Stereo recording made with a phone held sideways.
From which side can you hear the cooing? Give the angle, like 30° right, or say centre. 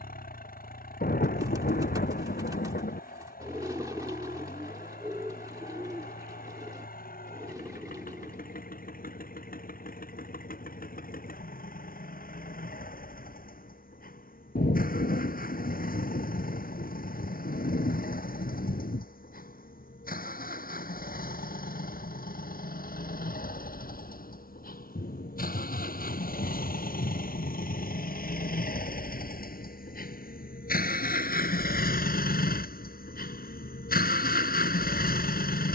20° right.